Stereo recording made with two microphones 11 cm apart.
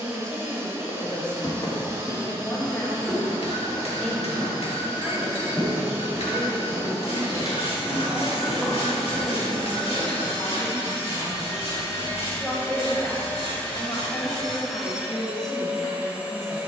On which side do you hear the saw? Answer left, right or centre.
left.